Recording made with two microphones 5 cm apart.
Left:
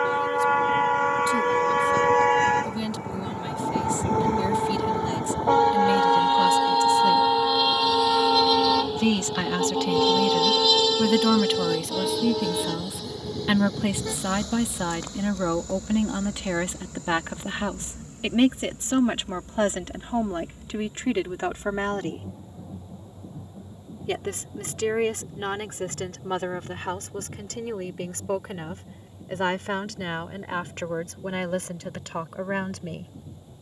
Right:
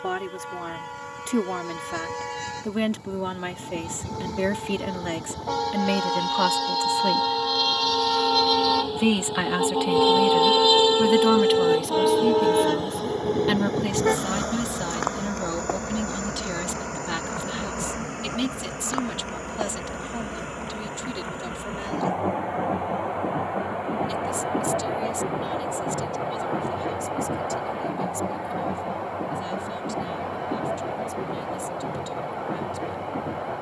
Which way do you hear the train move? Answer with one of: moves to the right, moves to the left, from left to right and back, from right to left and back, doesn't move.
moves to the right.